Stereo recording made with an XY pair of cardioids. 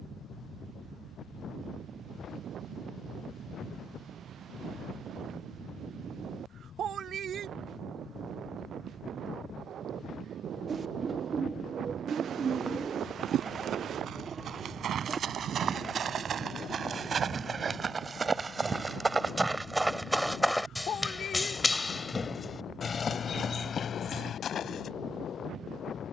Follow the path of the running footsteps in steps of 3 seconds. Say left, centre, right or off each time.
off, off, off, off, right, right, centre, left, left.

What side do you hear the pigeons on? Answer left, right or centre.
right.